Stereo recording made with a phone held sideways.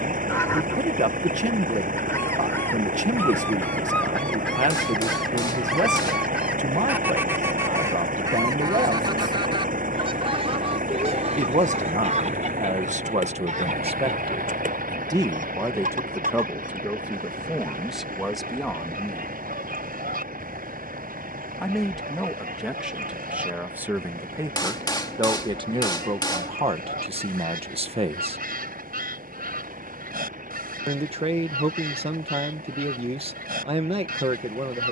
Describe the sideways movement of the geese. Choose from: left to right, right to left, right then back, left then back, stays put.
left to right.